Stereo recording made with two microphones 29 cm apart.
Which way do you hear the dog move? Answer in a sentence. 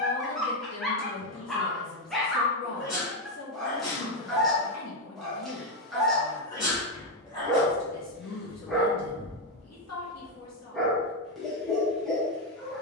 You can hear the dog stay in one place.